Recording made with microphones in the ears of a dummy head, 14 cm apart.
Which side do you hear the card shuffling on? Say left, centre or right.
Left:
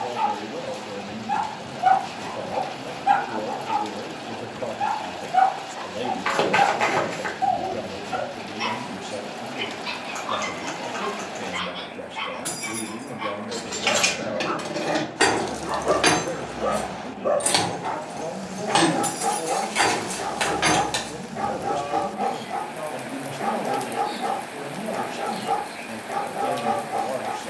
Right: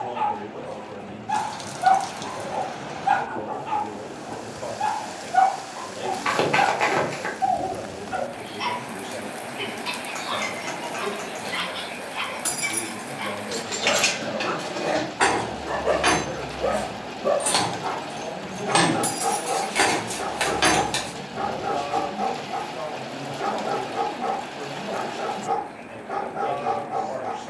centre.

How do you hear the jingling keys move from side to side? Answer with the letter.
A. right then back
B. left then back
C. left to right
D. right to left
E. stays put
B.